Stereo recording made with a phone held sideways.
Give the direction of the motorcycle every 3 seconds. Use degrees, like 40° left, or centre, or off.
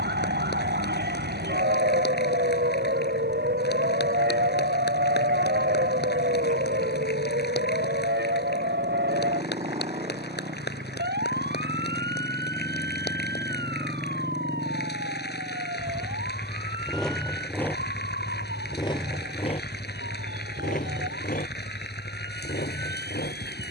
50° right, 50° right, 40° right, 40° right, 20° right, centre, 40° left, 60° left.